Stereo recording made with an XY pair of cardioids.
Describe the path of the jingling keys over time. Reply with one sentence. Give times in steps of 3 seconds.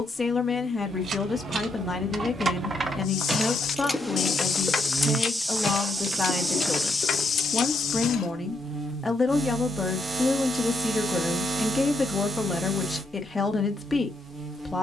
You can hear the jingling keys on the right from 0 s, in the centre from 3 s, on the left from 6 s and not at all from 9 s.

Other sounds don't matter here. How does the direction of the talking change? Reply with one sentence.
In this clip you hear the talking stay put.